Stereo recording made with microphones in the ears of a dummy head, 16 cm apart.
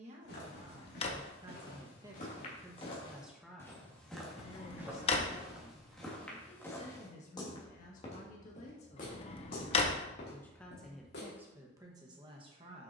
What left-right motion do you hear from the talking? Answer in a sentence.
You can hear the talking go left and come back.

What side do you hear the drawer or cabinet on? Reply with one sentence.
In this clip you hear the drawer or cabinet on the left.